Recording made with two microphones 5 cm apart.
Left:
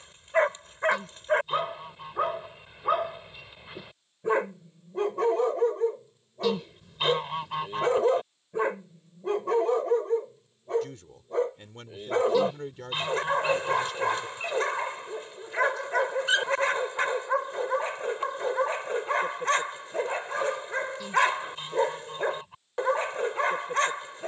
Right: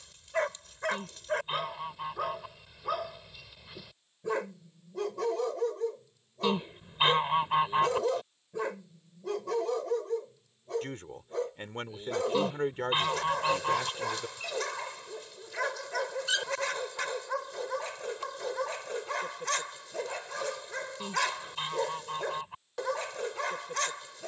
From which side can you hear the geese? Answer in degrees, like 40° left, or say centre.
20° right.